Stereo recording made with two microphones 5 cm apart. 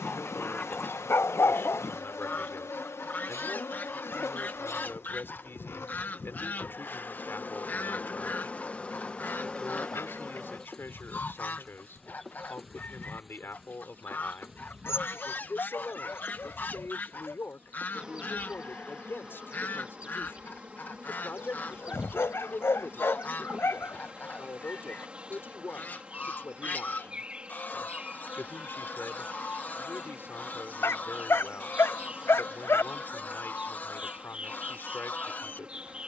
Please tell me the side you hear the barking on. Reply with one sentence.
You can hear the barking on the left.